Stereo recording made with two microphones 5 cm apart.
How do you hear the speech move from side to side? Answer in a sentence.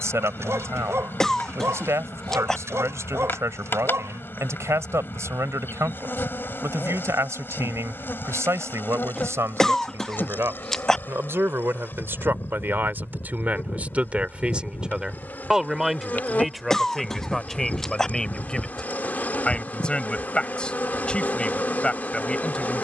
In this clip you hear the speech go from the right side to the left.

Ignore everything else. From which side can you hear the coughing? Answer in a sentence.
In this clip you hear the coughing in the centre.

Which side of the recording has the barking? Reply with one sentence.
In this clip you hear the barking on the right.